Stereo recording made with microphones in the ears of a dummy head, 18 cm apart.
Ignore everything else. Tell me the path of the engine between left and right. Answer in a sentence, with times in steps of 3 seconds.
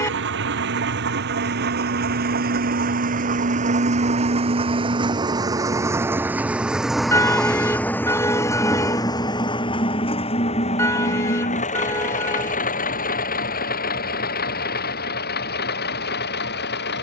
You can hear the engine on the right from 0 s, in the centre from 6 s and on the left from 9 s.